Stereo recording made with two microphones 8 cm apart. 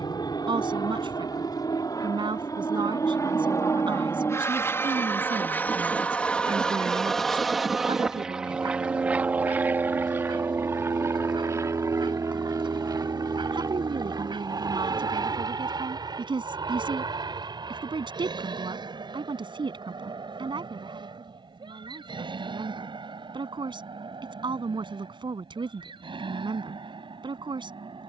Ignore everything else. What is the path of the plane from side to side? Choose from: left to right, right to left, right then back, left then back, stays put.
left to right.